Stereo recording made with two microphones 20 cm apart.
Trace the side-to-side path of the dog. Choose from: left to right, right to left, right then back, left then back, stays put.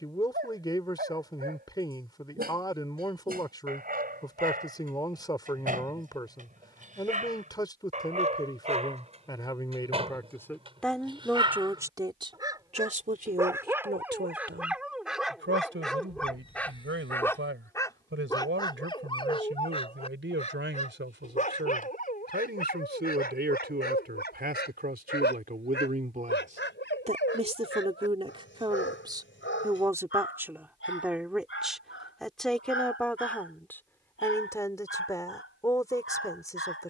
right to left.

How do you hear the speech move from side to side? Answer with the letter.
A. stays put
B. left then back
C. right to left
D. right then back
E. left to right
D.